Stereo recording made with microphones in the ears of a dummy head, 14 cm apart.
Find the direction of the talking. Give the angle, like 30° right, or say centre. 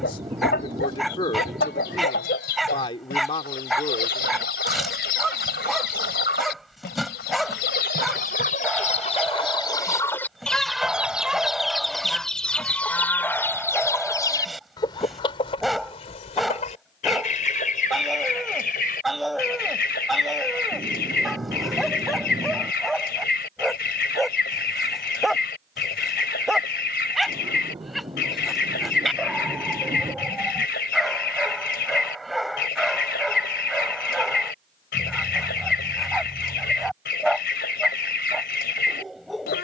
30° left.